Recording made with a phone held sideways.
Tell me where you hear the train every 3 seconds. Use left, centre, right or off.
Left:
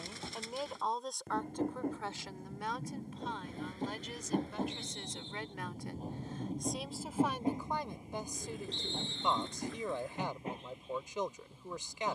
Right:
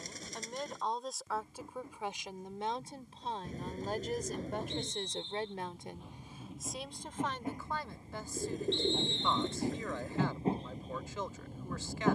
left, left, left, right.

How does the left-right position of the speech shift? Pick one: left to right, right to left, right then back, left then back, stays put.
right then back.